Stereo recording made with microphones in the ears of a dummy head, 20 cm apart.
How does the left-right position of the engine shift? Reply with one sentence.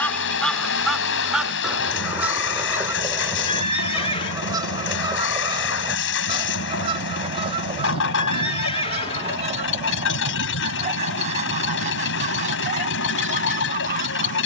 You can hear the engine stay put.